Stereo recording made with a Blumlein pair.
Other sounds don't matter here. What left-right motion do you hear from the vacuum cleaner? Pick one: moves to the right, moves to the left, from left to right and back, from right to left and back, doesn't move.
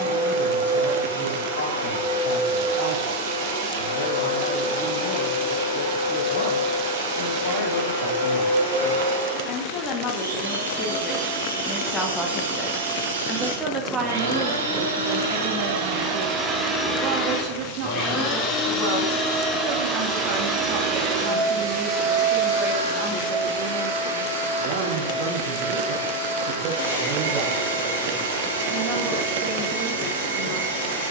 from right to left and back.